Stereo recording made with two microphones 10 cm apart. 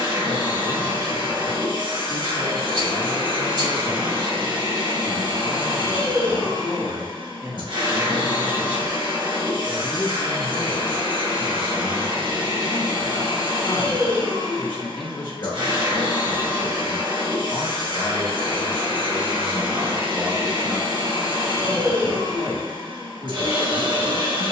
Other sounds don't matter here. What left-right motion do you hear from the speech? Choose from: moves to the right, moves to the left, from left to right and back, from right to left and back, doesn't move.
from right to left and back.